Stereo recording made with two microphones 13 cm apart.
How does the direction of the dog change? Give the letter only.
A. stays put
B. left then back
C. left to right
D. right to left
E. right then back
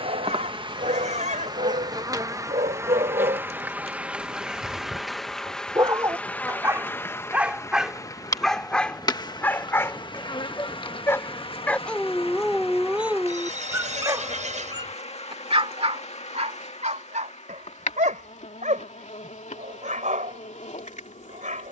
B.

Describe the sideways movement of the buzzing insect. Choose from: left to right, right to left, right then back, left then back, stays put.
right to left.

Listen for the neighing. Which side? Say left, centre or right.
right.